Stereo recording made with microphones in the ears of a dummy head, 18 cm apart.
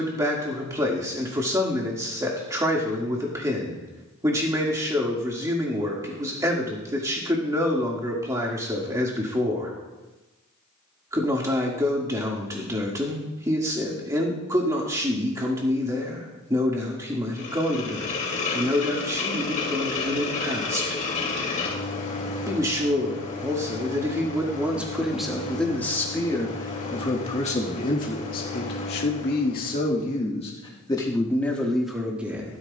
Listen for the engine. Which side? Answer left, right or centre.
left.